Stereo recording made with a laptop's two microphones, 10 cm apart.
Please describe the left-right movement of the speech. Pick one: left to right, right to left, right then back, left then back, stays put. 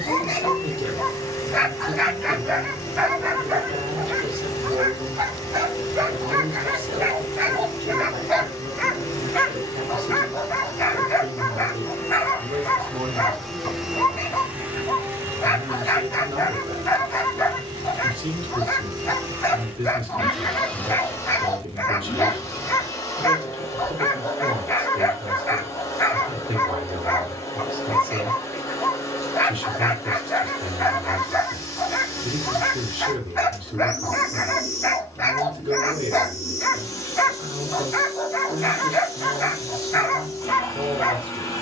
stays put.